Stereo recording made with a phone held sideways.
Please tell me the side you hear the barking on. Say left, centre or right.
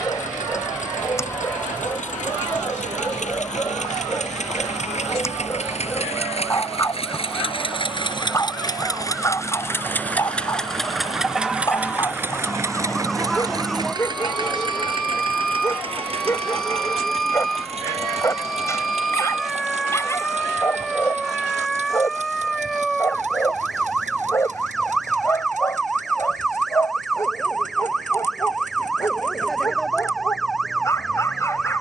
left.